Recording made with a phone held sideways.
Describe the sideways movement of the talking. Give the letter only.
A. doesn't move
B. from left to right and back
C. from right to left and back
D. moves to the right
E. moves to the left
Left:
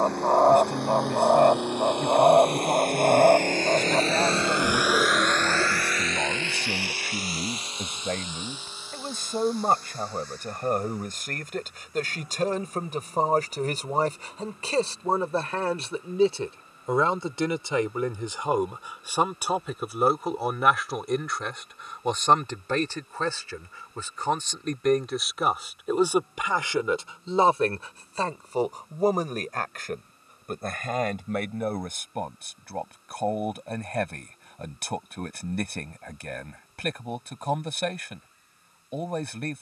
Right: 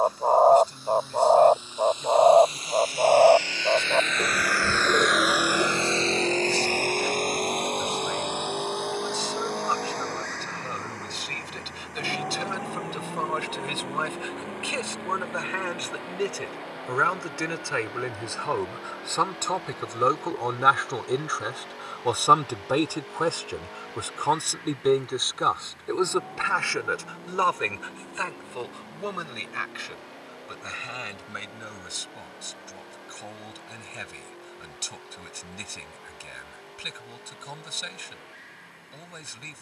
B.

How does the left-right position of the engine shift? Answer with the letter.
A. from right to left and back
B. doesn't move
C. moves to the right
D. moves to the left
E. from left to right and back
C.